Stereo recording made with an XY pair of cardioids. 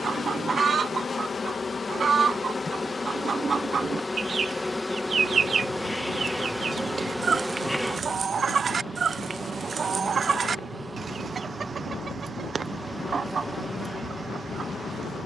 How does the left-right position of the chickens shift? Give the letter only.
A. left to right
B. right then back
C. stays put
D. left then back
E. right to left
C.